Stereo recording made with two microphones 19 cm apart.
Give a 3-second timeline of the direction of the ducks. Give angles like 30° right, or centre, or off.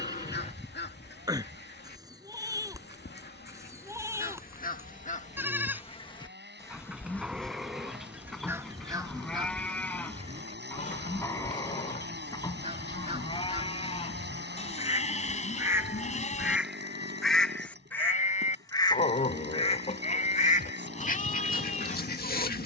60° left, 50° left, centre, 30° right, 30° right, 10° right, 30° left, 50° left.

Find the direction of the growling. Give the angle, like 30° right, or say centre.
40° left.